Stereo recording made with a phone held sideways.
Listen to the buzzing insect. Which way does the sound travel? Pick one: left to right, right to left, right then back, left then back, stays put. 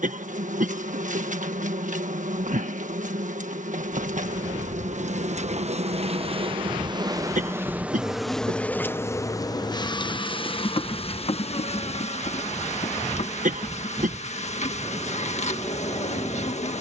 right to left.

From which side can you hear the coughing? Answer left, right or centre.
right.